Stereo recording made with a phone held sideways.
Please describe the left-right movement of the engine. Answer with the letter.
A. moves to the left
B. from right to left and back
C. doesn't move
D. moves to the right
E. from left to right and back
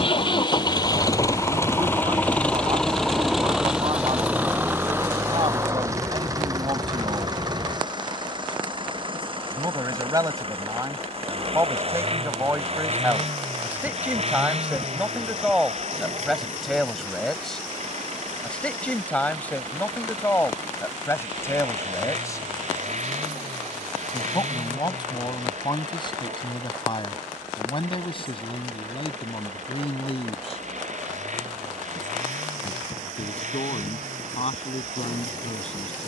D.